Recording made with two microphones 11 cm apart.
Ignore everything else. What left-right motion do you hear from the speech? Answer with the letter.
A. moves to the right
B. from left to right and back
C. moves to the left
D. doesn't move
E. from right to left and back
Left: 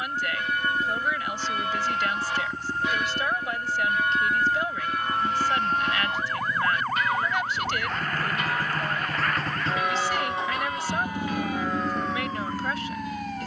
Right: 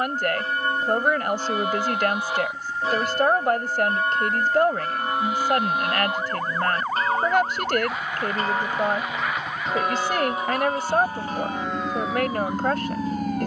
D.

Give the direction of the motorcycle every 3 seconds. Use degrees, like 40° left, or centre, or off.
50° left, 50° left, 40° left, 20° left, 30° right.